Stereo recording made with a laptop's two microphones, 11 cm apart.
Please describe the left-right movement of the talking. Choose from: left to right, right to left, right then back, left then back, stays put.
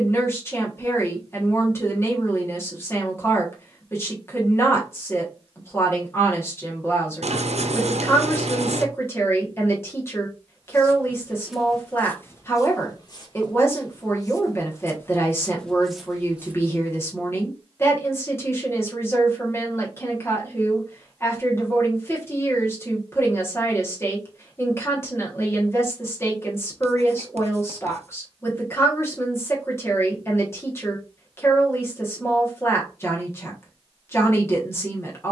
stays put.